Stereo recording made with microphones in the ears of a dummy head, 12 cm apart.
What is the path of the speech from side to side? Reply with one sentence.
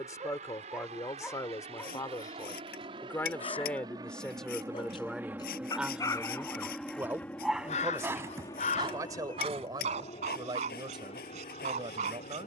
In this clip you hear the speech go from the left side to the right.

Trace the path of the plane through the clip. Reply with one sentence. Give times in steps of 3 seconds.
In this clip you hear the plane on the right from 0 s, in the centre from 6 s and on the left from 9 s.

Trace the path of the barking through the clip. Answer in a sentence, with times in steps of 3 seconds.
In this clip you hear the barking in the centre from 0 s, on the left from 3 s, in the centre from 6 s and on the right from 9 s.